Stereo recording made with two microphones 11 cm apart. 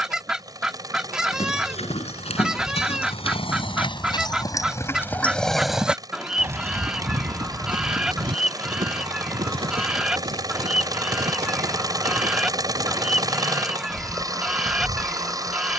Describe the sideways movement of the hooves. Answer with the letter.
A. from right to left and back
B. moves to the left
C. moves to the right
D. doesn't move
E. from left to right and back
C.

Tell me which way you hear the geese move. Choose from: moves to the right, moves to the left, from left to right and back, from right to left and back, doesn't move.
doesn't move.